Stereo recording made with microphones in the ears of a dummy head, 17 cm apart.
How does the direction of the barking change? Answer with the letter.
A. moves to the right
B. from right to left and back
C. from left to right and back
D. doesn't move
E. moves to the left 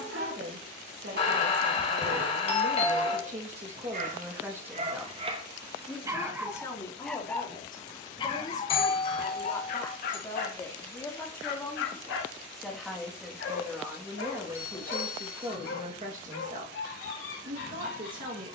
E.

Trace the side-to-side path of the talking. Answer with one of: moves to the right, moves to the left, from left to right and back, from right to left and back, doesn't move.
from right to left and back.